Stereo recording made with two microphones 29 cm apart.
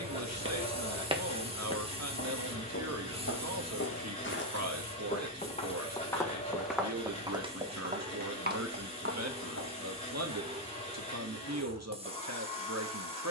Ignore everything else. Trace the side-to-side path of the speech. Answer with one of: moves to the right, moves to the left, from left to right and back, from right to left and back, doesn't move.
doesn't move.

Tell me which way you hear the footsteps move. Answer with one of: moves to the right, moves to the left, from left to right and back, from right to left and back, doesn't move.
from right to left and back.